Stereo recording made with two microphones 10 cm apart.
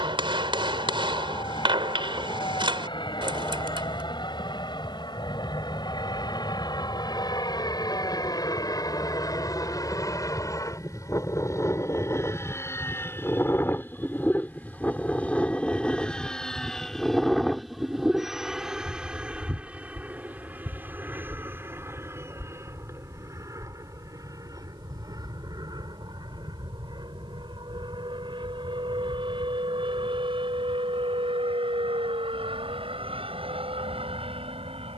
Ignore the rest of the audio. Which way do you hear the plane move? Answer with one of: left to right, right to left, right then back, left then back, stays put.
left to right.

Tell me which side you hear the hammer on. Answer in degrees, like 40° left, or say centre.
50° right.